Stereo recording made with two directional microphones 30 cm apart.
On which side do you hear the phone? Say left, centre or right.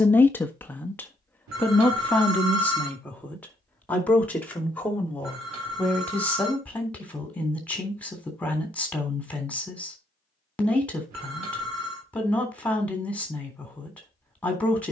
right.